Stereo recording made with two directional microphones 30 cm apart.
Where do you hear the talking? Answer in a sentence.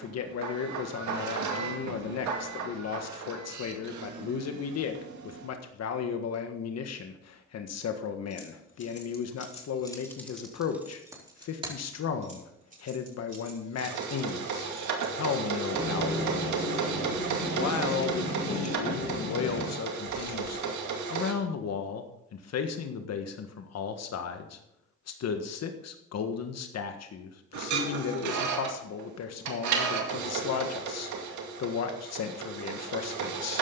You can hear the talking on the left.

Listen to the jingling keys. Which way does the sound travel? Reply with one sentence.
You can hear the jingling keys go right and come back.